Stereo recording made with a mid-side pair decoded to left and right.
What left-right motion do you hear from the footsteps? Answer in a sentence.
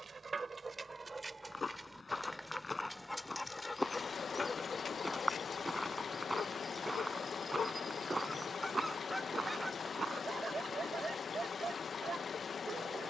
In this clip you hear the footsteps travel towards the right.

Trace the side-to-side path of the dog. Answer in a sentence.
You can hear the dog move from right to left and back again.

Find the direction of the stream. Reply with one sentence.
In this clip you hear the stream on the left.